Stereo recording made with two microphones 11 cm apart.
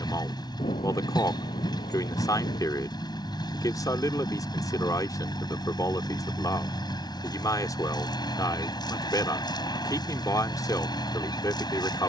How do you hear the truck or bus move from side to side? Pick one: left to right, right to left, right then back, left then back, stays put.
stays put.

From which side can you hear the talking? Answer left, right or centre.
left.